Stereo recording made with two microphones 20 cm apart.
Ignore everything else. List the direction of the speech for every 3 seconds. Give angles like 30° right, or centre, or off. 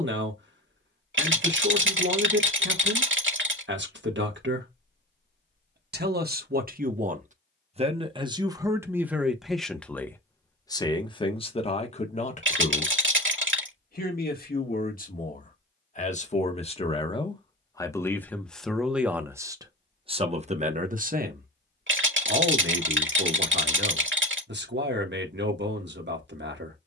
60° right, 60° right, 30° right, 10° left, 40° left, 30° left, 10° right, 60° right, 60° right.